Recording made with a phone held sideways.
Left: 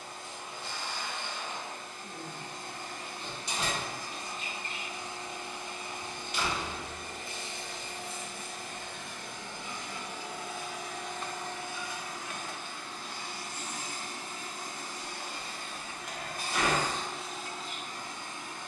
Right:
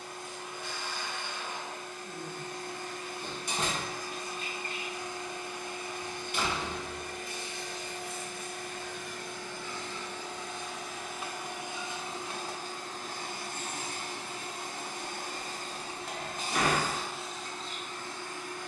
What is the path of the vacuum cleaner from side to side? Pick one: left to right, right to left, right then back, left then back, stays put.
right then back.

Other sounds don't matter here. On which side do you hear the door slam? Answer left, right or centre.
right.